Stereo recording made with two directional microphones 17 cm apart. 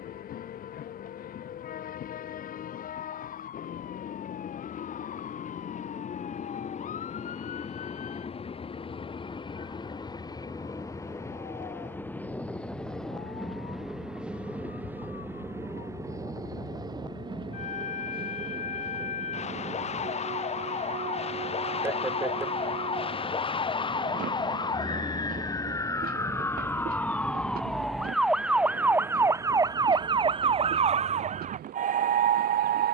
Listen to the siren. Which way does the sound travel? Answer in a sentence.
You can hear the siren travel towards the right.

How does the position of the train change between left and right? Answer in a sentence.
You can hear the train move from left to right.